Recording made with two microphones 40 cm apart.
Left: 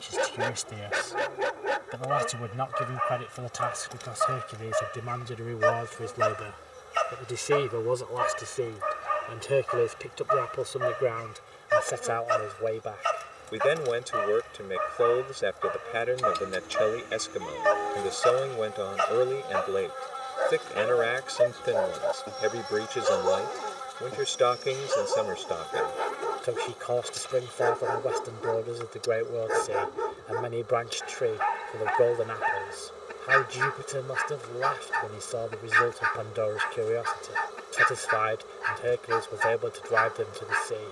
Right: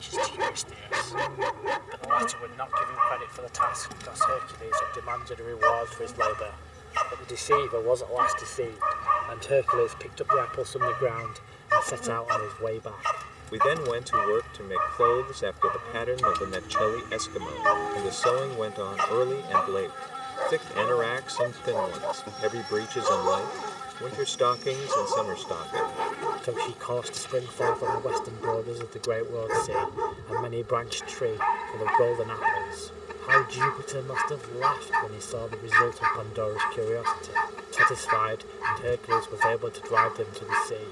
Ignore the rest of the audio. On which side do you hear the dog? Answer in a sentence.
You can hear the dog in the centre.